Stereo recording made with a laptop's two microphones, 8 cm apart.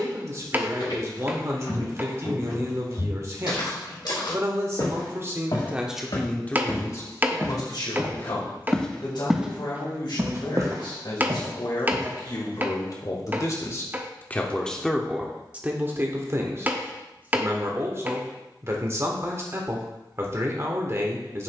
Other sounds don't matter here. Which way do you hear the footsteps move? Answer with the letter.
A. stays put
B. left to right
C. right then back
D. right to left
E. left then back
B.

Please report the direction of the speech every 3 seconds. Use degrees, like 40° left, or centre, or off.
40° right, 30° right, 40° left, 70° left, 40° left, 30° right, 30° right.